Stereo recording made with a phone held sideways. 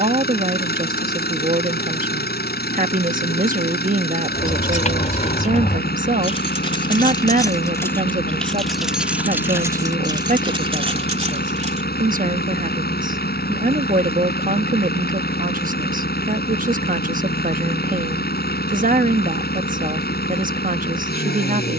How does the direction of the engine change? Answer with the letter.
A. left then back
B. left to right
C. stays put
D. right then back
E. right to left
C.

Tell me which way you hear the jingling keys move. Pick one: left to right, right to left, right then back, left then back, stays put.
left to right.